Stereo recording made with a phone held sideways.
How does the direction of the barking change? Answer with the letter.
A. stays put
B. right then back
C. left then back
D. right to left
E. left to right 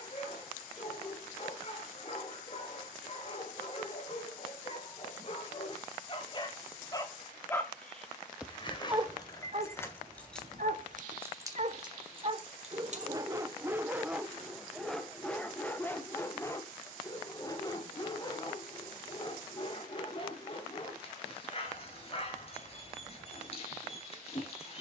B.